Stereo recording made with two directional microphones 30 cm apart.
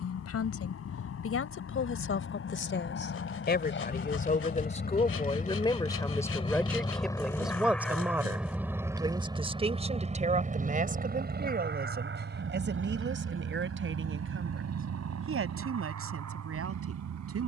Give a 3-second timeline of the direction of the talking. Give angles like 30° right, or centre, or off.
50° left, 20° left, centre, 20° right, 40° right, 50° right.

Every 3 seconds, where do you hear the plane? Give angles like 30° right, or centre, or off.
50° left, 40° left, 10° left, 20° right, 40° right, 50° right.